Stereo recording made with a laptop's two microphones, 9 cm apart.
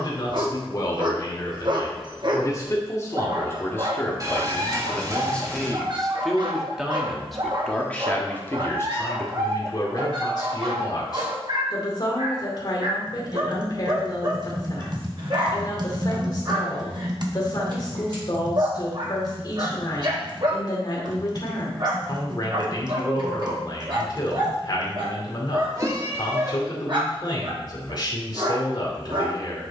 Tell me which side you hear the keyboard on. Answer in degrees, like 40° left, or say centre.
40° right.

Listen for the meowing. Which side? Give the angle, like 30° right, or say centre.
30° right.